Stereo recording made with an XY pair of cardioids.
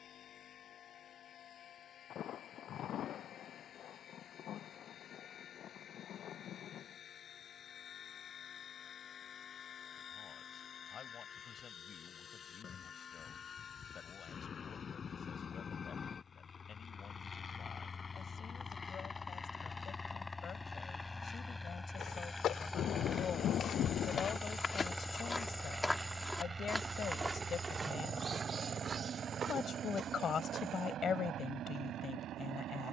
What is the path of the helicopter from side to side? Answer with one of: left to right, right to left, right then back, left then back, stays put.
left to right.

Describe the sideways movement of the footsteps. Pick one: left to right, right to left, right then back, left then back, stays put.
left to right.